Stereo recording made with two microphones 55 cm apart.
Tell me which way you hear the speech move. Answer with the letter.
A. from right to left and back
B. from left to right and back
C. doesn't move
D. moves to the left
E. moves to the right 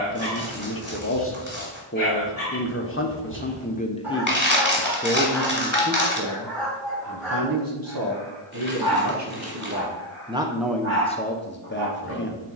B.